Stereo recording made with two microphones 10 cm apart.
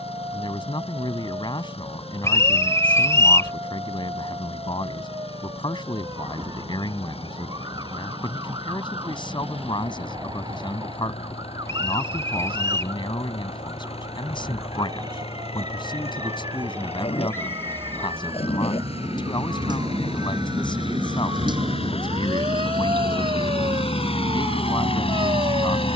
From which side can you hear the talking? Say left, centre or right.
left.